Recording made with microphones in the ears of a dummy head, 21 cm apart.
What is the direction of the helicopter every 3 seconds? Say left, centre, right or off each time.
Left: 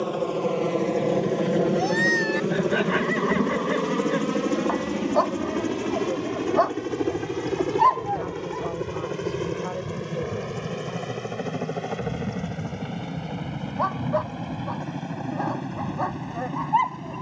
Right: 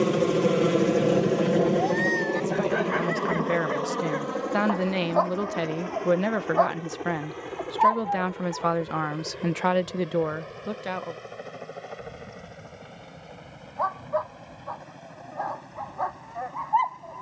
centre, left, left, left, left, left.